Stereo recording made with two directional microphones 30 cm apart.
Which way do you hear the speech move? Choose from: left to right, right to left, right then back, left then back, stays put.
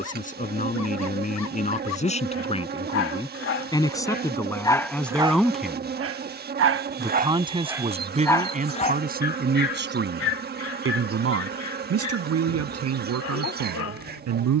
left to right.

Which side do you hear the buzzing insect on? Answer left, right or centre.
right.